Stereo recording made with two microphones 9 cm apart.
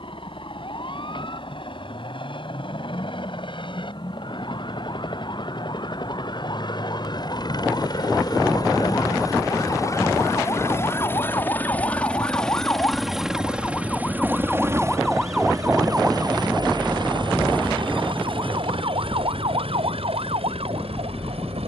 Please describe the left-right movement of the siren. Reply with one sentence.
You can hear the siren travel towards the right.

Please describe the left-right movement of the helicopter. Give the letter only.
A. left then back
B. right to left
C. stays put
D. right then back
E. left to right
E.